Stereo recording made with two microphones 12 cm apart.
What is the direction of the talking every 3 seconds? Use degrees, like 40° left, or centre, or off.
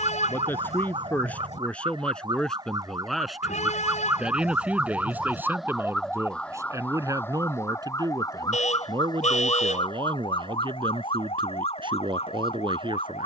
10° left, 10° right, 30° right, 40° right, 40° right.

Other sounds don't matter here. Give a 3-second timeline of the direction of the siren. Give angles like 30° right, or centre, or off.
40° right, 10° right, 20° left, 50° left, 60° left.